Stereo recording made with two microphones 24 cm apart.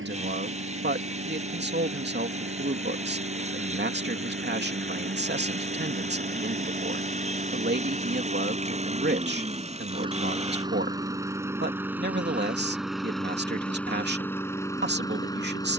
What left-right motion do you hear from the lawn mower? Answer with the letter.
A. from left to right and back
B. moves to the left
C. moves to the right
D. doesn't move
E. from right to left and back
B.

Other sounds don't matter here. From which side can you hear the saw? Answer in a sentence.
You can hear the saw on the right.